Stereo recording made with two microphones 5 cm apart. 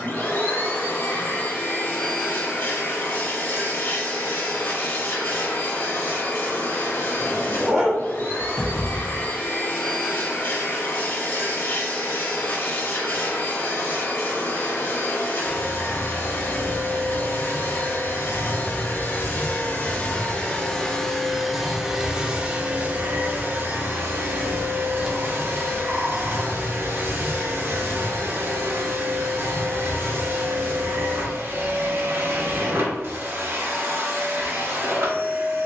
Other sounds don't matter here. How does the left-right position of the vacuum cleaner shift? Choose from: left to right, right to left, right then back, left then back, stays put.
left to right.